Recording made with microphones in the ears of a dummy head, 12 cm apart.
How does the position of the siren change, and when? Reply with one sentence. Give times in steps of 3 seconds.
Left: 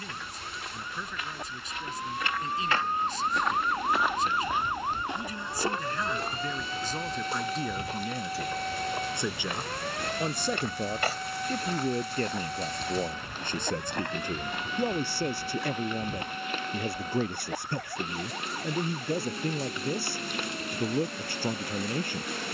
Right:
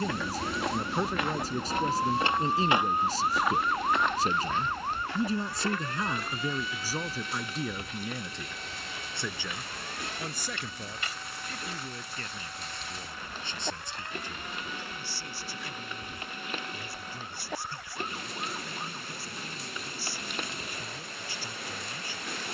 You can hear the siren on the right from 0 s, in the centre from 3 s and on the left from 6 s.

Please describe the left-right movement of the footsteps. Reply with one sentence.
You can hear the footsteps move to the left.